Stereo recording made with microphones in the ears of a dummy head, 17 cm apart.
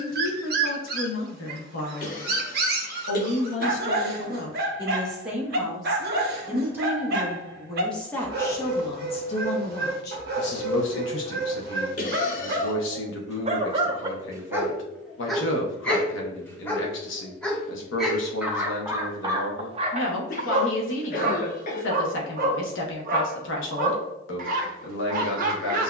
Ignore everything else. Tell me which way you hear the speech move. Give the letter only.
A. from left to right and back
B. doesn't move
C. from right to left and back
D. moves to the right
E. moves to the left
A.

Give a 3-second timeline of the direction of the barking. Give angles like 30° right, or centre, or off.
60° right, 60° right, 60° right, 60° right, 30° right, 10° left, 20° right, 50° right, 50° right.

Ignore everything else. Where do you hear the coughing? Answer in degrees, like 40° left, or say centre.
50° left.